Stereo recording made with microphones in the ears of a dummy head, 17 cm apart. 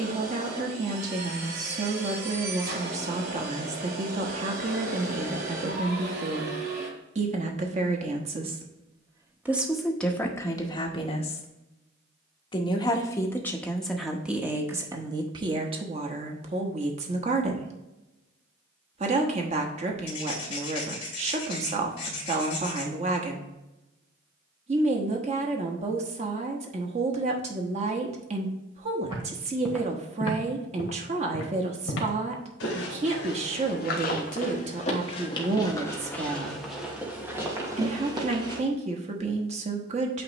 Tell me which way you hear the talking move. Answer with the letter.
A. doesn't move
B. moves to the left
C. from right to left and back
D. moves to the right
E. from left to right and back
C.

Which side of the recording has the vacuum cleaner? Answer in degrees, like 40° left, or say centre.
60° right.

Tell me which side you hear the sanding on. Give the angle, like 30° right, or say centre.
30° left.